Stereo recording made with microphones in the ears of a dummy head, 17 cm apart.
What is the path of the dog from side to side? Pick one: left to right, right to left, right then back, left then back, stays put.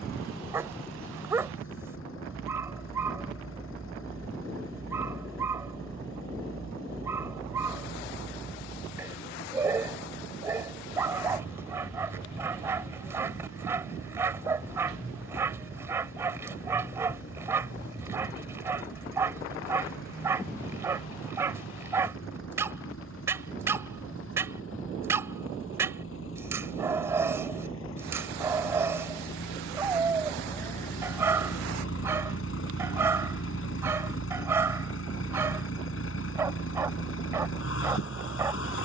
stays put.